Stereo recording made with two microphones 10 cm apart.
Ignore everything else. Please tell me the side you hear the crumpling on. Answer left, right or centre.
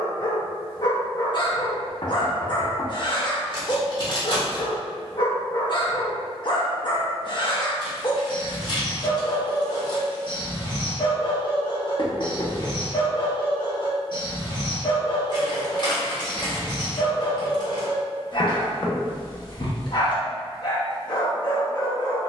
left.